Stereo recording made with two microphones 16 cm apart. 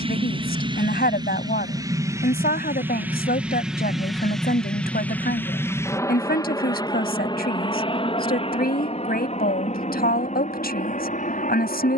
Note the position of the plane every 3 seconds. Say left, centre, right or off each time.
right, centre, left, left.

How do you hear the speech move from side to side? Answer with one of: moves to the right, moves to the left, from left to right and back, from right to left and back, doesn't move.
doesn't move.